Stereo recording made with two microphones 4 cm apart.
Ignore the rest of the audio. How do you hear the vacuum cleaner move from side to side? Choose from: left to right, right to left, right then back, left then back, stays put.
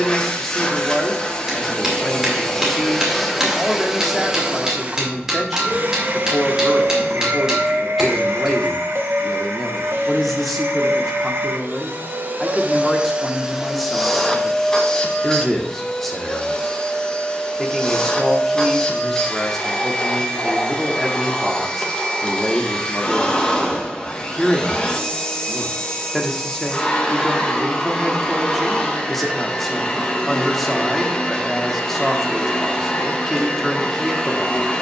right then back.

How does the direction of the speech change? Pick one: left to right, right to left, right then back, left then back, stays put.
stays put.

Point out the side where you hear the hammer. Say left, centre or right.
centre.